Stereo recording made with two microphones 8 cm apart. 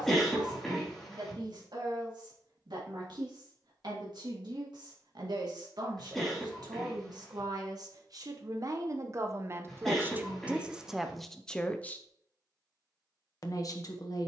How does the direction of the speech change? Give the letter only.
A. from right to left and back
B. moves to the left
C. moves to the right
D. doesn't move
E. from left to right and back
B.